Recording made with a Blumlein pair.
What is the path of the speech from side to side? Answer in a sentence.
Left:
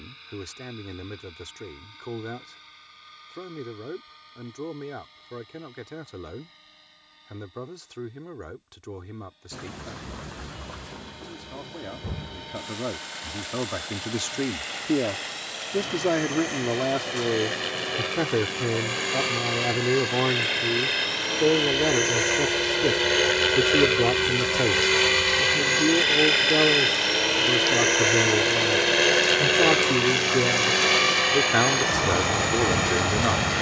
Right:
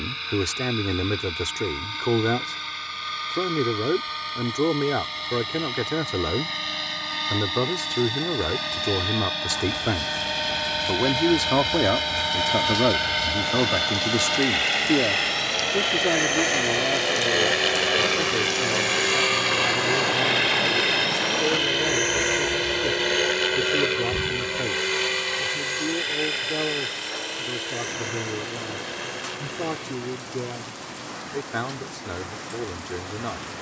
You can hear the speech move to the left.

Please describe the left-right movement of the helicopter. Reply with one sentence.
In this clip you hear the helicopter move from right to left.